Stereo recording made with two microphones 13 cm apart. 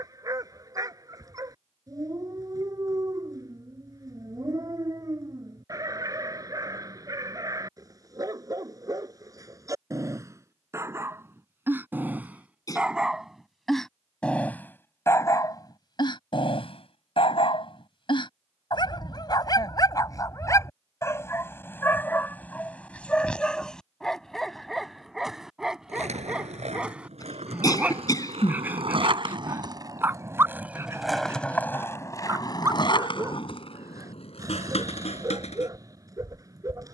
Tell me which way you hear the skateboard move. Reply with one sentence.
In this clip you hear the skateboard move from right to left.